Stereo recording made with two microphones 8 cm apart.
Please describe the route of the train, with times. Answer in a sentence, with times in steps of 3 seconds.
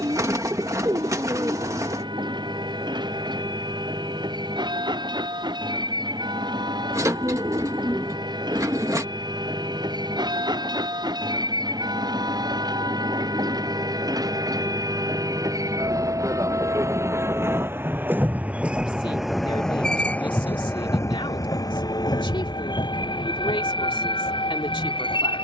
You can hear the train on the right from 0 s, in the centre from 18 s and on the left from 21 s.